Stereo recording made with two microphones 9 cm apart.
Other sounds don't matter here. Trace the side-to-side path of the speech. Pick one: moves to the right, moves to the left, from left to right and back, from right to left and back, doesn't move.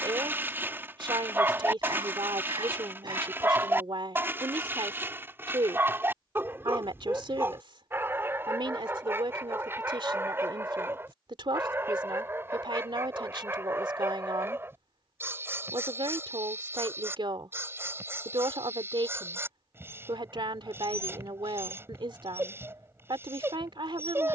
doesn't move.